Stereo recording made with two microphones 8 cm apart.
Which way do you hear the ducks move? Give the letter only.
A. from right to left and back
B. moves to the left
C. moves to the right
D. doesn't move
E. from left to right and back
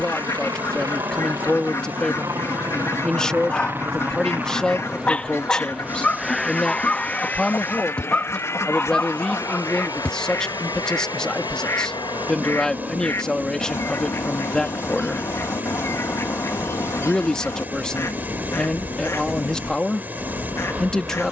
D.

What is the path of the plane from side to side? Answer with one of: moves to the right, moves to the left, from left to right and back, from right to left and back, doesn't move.
moves to the left.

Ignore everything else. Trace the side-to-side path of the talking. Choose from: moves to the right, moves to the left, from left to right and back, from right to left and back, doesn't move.
doesn't move.